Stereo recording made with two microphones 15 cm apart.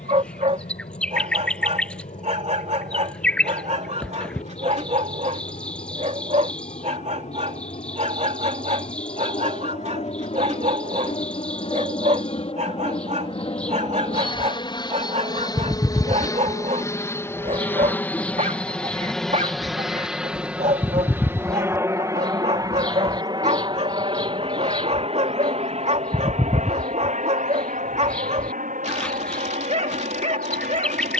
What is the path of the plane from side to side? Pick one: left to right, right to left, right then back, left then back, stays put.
left to right.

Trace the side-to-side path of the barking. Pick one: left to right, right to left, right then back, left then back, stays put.
stays put.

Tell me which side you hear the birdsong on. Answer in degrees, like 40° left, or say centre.
10° left.